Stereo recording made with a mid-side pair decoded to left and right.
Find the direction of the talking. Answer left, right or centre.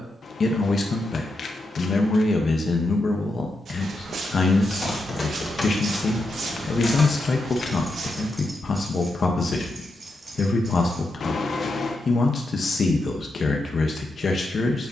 left.